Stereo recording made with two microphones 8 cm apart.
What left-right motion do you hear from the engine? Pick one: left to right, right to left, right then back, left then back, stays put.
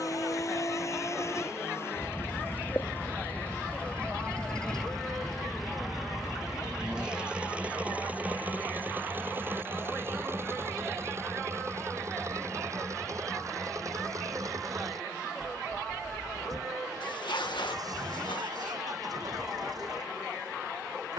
left to right.